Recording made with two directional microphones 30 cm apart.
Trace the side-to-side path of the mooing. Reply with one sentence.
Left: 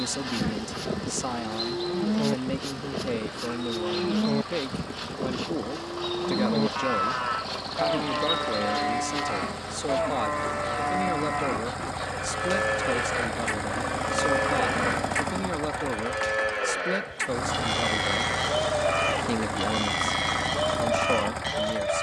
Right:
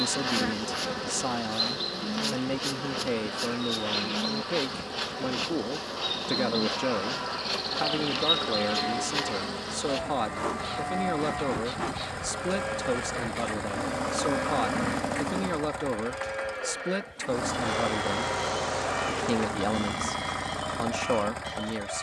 You can hear the mooing stay in one place.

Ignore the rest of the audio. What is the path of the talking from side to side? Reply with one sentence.
You can hear the talking stay put.